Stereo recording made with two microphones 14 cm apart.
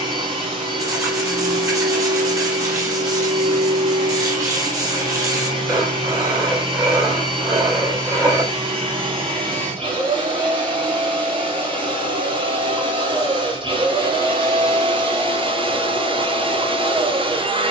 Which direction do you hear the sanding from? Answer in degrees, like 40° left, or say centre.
20° right.